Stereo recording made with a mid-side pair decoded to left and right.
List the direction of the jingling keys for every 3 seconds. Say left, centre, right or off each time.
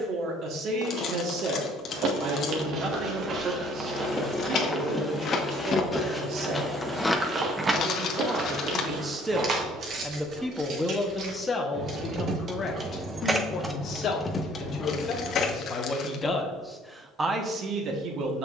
off, left, centre, right, centre, left.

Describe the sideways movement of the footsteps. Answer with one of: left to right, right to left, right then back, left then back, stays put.
left then back.